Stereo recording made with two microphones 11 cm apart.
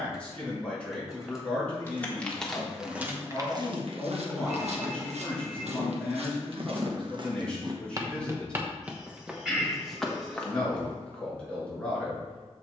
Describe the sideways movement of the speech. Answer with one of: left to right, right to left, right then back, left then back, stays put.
stays put.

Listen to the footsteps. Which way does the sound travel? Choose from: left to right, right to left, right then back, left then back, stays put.
right then back.